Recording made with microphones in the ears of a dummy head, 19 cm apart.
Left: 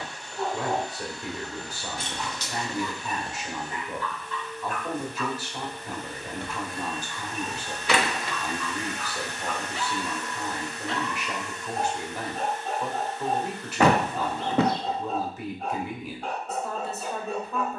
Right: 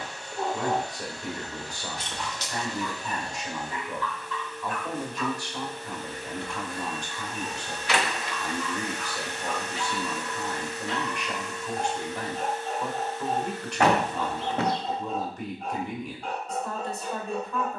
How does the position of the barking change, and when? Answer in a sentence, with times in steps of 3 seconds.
You can hear the barking in the centre from 0 s and on the left from 3 s.